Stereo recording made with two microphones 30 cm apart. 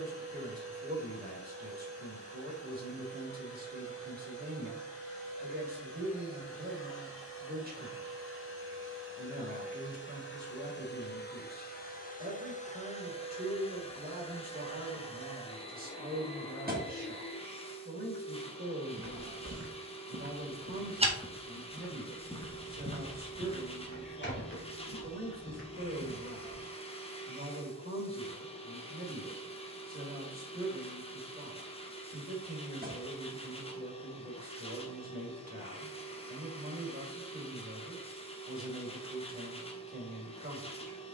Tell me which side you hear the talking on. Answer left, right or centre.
right.